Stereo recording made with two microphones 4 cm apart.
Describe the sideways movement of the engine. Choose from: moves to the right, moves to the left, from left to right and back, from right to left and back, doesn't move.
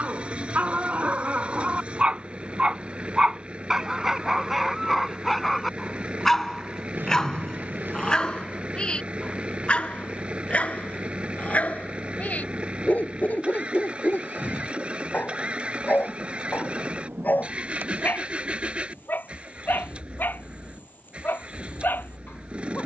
doesn't move.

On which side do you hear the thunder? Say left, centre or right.
right.